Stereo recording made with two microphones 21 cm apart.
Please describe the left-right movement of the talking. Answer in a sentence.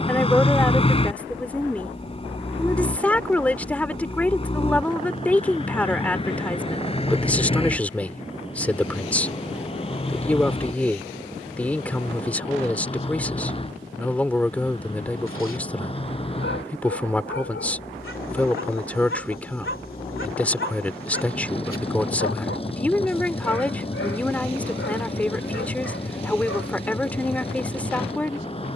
In this clip you hear the talking stay put.